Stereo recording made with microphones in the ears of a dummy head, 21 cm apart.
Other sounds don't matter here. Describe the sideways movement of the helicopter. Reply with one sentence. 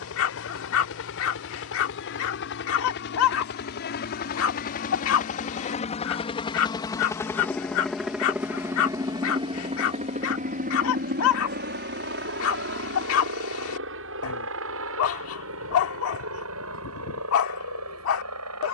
You can hear the helicopter go from the left side to the right.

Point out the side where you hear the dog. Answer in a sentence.
In this clip you hear the dog on the left.